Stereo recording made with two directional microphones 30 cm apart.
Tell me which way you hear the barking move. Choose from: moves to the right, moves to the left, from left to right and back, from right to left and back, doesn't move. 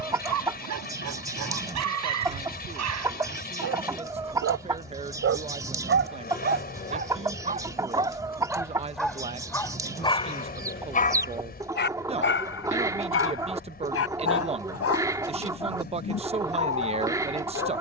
moves to the left.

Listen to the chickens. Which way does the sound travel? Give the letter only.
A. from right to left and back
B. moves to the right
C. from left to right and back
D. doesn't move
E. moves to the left
D.